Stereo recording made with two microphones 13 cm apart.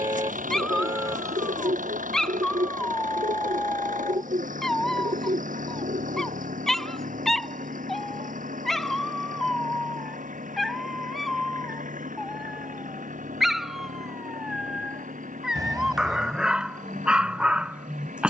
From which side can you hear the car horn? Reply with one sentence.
In this clip you hear the car horn on the right.